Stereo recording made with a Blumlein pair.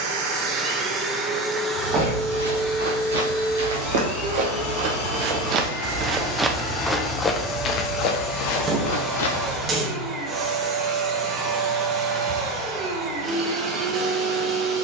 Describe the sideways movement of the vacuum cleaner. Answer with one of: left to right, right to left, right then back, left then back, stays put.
left then back.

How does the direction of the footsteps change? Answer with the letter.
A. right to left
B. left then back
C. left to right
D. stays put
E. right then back
A.